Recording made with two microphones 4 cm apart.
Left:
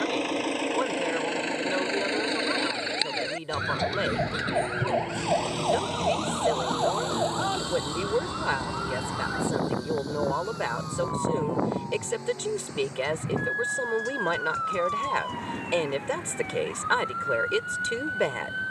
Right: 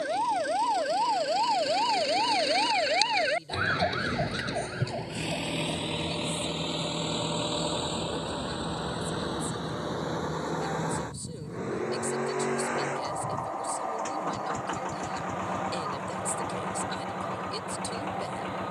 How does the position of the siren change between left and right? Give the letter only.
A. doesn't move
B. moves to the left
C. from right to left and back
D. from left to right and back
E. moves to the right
B.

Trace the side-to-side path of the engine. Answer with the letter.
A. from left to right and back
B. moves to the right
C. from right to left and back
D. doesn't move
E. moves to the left
B.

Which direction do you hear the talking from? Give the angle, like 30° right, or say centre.
60° left.